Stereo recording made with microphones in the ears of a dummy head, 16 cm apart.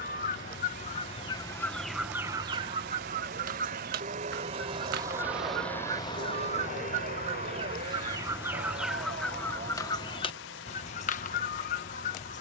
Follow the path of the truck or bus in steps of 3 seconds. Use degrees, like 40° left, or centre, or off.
70° right, 30° right, 50° left, 80° left.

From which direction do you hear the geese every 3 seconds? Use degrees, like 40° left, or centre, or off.
10° left, 50° right, 30° right, 30° left.